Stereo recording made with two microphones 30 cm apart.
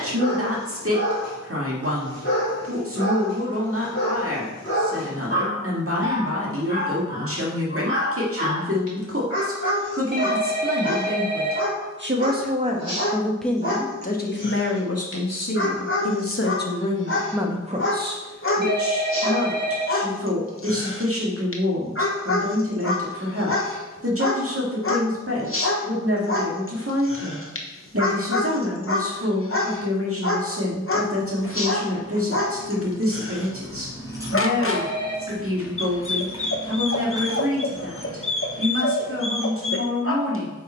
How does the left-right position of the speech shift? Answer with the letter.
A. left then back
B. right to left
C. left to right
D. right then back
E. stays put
A.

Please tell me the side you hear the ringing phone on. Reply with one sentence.
You can hear the ringing phone on the right.